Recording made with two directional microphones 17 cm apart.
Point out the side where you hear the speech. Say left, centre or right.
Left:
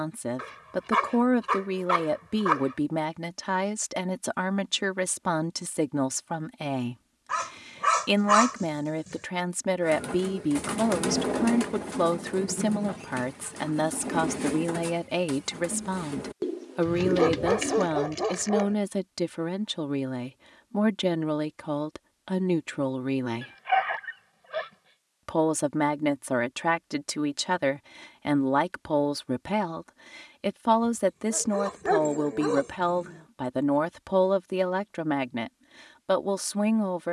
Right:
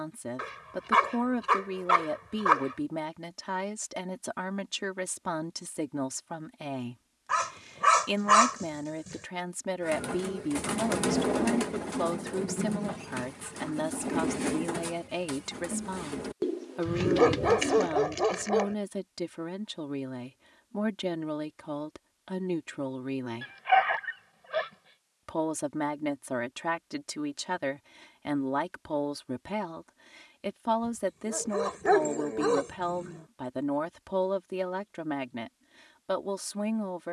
left.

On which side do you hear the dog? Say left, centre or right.
centre.